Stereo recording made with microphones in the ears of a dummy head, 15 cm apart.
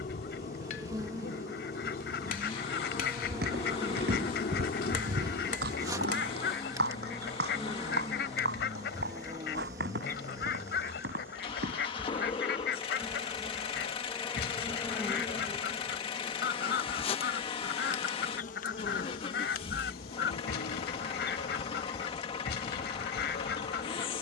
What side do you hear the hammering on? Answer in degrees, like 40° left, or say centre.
50° left.